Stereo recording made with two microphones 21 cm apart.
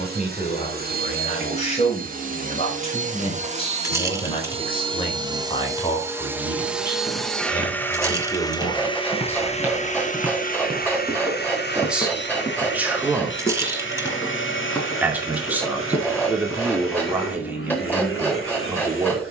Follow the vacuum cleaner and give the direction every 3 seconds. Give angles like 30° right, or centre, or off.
40° right, 30° right, centre, 40° left, 60° left, 70° left, 80° left.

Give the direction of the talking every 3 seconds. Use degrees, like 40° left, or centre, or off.
30° left, 30° left, 20° left, 10° left, 10° right, 10° right, 10° right.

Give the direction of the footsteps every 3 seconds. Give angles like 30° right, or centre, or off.
off, off, 30° right, centre, 10° left, 10° right, off.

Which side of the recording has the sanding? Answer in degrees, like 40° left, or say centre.
10° left.